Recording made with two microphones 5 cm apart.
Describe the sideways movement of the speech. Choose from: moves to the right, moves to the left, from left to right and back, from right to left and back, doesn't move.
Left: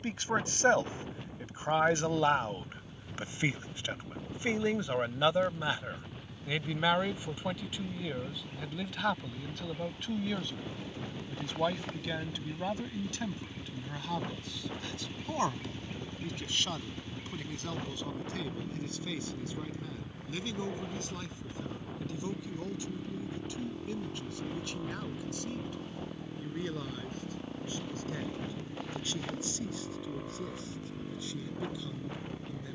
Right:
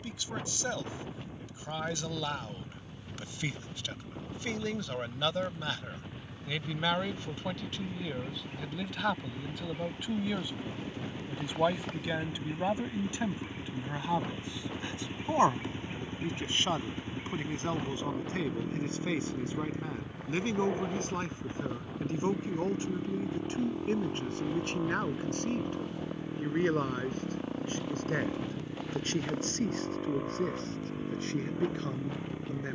moves to the right.